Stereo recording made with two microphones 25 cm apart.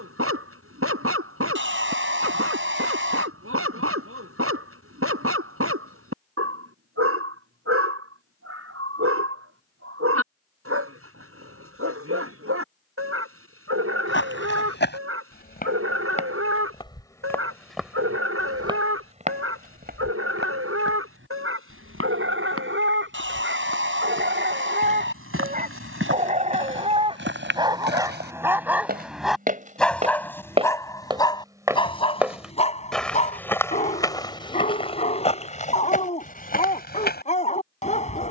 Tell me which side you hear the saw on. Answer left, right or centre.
right.